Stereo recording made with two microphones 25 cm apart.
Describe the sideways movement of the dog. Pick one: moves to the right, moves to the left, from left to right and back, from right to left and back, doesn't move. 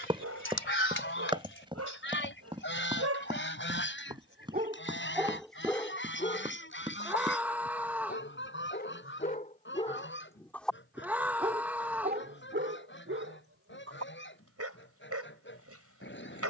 from right to left and back.